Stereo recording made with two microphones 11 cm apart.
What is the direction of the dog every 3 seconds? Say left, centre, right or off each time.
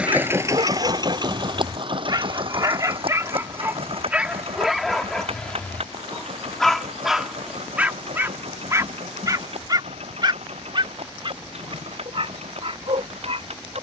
right, centre, centre, right, right.